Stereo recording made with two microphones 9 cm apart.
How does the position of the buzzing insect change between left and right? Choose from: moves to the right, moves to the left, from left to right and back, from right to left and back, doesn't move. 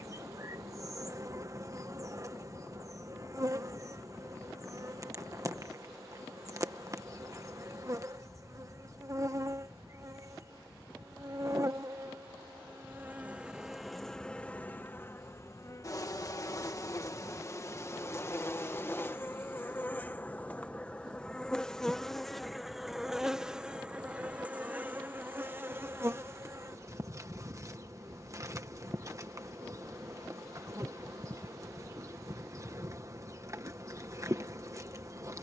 from right to left and back.